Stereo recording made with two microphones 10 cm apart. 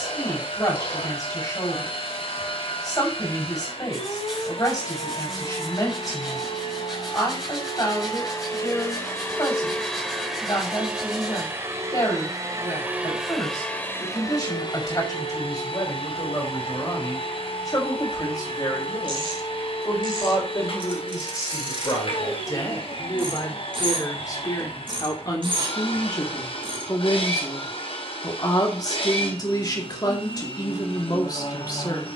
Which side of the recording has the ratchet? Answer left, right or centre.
right.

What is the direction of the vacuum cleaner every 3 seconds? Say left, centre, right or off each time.
left, left, left, centre, centre, left, left, left, left, left, left.